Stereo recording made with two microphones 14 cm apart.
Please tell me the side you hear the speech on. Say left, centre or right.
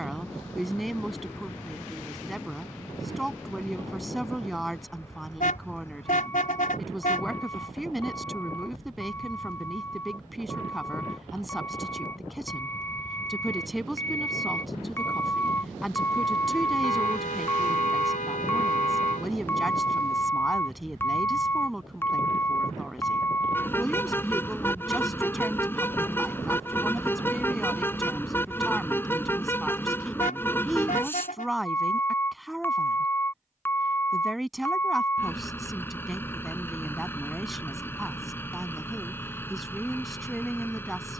centre.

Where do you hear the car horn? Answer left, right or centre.
left.